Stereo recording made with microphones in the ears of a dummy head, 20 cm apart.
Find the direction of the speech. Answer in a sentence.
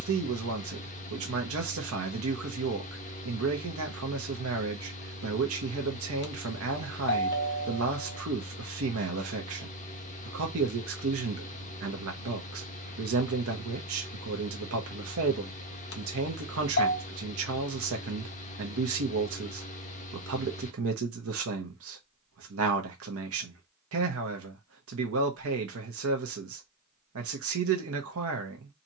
In this clip you hear the speech on the right.